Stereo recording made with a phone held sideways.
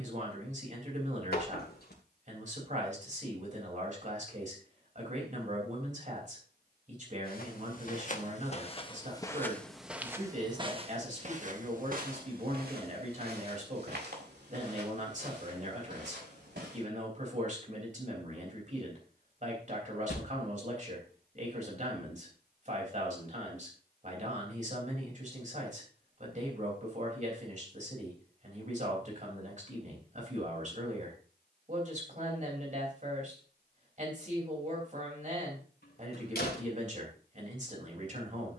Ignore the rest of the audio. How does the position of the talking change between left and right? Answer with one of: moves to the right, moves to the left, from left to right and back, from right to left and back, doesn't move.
doesn't move.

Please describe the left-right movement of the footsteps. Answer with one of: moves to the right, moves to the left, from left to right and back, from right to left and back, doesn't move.
moves to the right.